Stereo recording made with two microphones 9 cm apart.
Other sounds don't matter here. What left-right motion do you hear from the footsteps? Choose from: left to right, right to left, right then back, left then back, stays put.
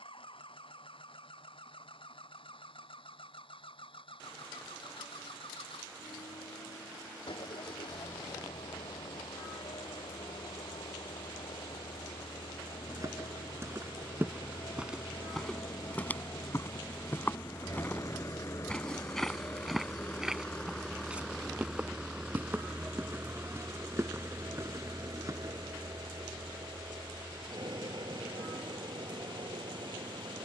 left then back.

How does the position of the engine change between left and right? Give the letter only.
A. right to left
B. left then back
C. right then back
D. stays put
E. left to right
E.